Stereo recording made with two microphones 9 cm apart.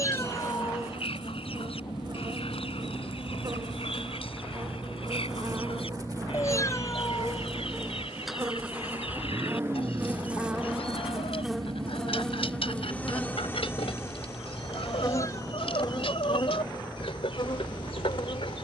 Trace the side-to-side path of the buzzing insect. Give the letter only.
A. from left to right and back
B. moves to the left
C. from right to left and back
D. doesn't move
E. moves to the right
B.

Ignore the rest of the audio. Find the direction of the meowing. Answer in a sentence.
You can hear the meowing on the left.